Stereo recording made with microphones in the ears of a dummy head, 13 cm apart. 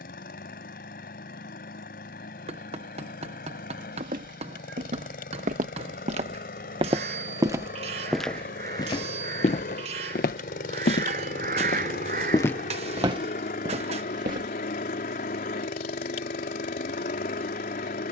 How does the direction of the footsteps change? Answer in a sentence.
You can hear the footsteps move from right to left and back again.